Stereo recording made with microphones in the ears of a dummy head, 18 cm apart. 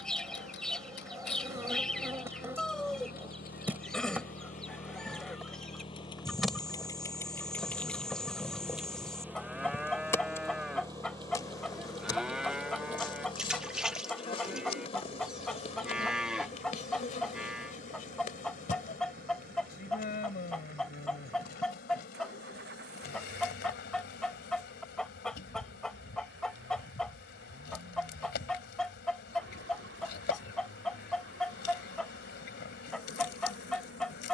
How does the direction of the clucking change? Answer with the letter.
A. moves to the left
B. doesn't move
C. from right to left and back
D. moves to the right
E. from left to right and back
B.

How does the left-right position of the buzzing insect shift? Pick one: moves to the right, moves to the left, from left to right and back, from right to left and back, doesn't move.
moves to the left.